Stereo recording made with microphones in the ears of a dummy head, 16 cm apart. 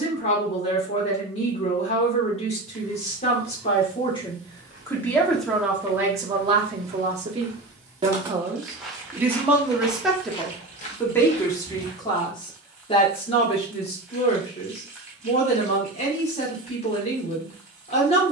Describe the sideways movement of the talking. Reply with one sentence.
You can hear the talking go right and come back.